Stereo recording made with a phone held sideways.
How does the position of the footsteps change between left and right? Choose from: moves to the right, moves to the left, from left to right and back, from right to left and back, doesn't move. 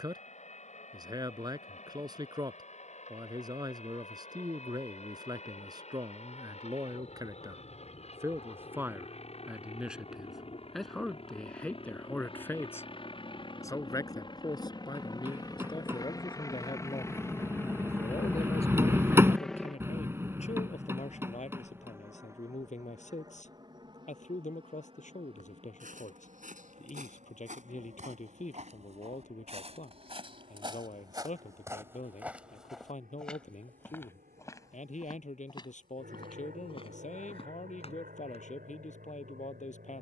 moves to the left.